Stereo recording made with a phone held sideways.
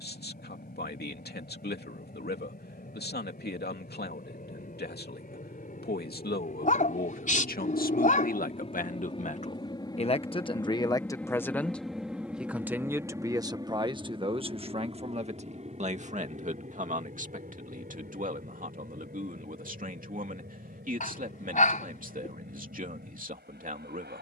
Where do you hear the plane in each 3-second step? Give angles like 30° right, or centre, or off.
70° left, 70° left, 50° left, 20° left, 20° right, 40° right, 60° right, 60° right.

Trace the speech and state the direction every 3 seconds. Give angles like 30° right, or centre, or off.
80° left, 80° left, 70° left, 30° left, 20° right, 50° right, 60° right, 60° right.